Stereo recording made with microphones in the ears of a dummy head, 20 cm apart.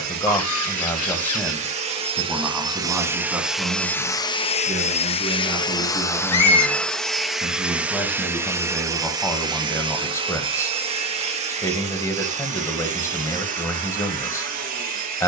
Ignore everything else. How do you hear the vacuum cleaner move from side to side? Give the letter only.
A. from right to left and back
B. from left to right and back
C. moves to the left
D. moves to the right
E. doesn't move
A.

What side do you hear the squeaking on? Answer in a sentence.
You can hear the squeaking on the left.